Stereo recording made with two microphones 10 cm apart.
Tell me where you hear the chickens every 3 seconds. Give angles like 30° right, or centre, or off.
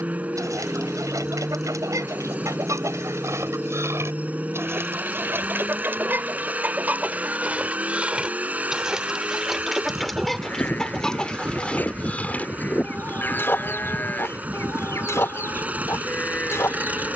30° right, 30° right, 10° right, centre, 20° left, 30° left.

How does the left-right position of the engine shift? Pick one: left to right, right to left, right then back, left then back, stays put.
stays put.